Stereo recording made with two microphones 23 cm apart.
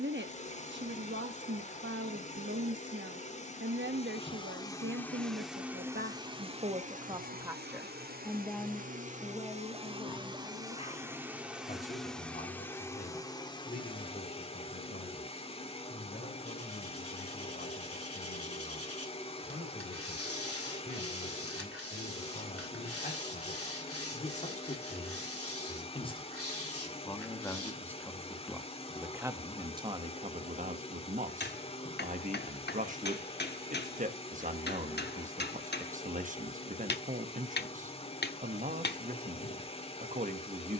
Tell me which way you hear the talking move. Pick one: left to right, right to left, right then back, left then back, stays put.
left then back.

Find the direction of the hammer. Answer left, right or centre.
left.